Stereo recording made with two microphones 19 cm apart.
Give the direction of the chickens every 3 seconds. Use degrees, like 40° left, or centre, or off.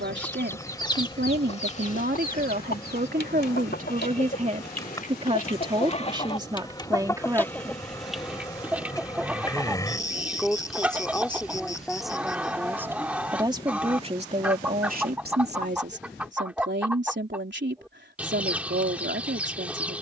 30° left, 50° left, 10° left, 10° right, 10° right, 10° right, 10° right.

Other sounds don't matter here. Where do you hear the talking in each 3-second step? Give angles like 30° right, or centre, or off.
60° right, 40° right, 20° right, centre, 20° right, 70° right, 70° right.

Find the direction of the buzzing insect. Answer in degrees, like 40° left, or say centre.
20° left.